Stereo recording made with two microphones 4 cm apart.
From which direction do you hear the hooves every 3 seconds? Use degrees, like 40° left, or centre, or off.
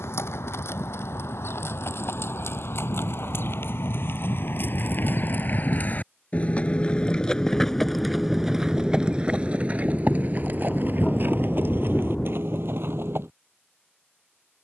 70° left, 50° left, 10° left, 40° right, 60° right.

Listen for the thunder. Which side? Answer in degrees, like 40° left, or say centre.
20° left.